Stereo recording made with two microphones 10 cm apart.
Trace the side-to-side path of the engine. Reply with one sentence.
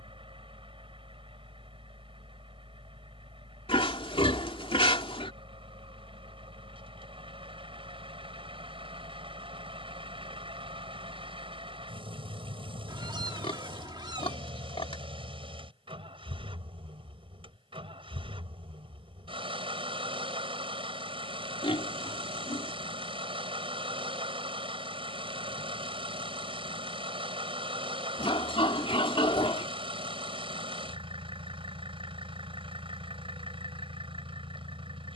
You can hear the engine stay in one place.